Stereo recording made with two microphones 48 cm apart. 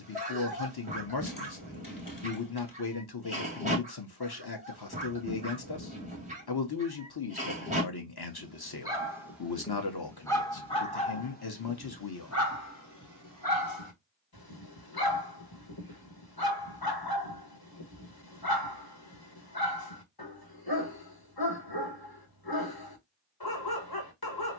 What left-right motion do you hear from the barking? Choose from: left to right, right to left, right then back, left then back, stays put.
right to left.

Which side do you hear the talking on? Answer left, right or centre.
left.